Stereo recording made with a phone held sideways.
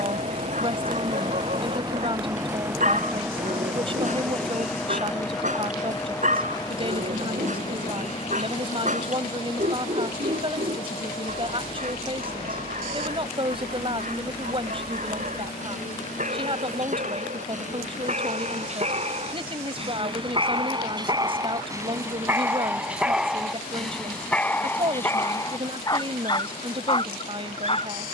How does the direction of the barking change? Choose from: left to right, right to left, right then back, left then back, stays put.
right to left.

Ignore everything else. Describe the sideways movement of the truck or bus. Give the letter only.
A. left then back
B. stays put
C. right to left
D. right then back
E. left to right
C.